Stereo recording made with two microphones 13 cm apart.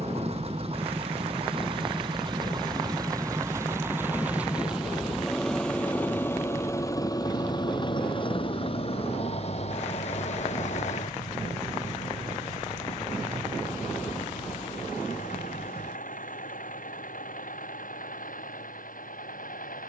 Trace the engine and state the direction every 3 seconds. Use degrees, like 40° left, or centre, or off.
40° right, 10° right, 30° left, 50° left, 70° left, 70° left, 80° left.